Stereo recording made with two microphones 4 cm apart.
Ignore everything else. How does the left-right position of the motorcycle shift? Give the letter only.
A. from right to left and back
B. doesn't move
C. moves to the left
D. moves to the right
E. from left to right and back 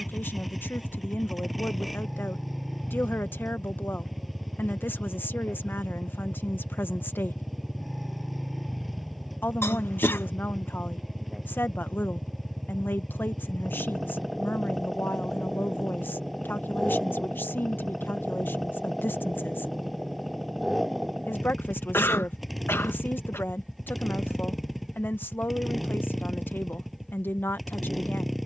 B.